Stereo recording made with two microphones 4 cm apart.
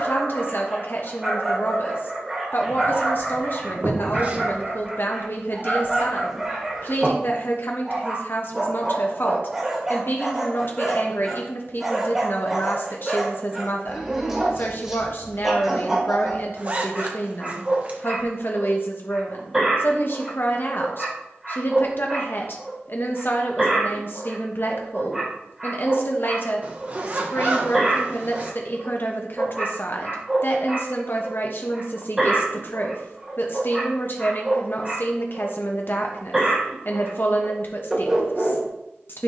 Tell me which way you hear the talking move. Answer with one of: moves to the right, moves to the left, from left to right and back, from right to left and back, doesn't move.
doesn't move.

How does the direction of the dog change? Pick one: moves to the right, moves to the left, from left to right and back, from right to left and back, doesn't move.
doesn't move.